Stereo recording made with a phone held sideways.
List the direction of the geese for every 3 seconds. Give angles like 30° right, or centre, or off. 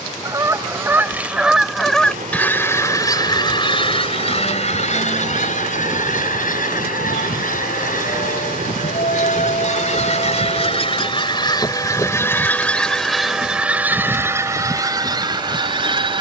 centre, 50° left, 70° left, 40° left, centre, 30° right.